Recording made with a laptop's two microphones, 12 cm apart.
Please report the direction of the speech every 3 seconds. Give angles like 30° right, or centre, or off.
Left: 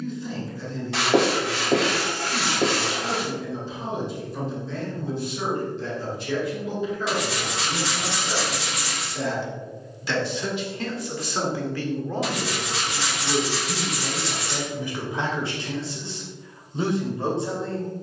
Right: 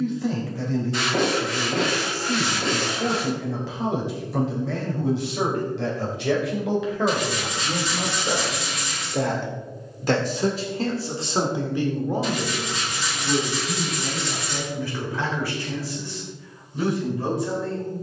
80° right, 80° right, 70° right, 30° right, centre, 20° left.